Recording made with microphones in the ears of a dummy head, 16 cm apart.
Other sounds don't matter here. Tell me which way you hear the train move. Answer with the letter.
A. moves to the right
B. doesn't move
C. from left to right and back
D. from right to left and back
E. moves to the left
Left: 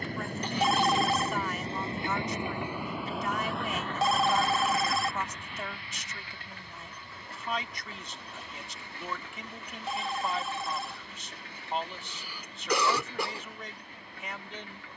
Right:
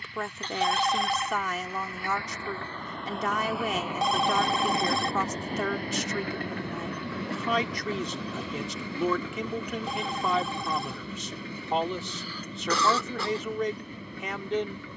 A.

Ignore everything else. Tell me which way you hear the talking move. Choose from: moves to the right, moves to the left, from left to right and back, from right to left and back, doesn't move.
doesn't move.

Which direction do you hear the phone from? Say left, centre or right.
centre.